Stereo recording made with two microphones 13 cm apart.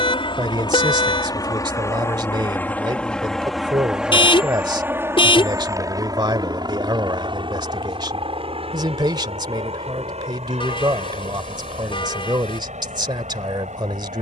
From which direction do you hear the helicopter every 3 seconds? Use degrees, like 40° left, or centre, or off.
30° left, 10° right, 40° right, 50° right, 60° right.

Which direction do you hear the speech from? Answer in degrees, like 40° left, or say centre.
40° right.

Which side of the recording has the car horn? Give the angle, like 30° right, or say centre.
40° left.